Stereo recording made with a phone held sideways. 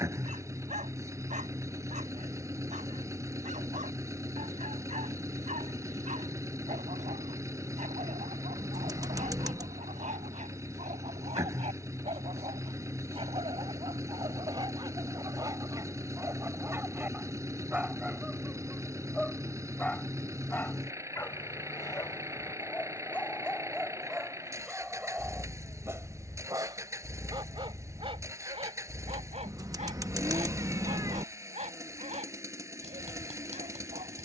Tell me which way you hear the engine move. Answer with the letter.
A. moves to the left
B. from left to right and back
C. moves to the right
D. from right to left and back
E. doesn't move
E.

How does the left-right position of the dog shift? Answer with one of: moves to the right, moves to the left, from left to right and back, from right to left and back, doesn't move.
from right to left and back.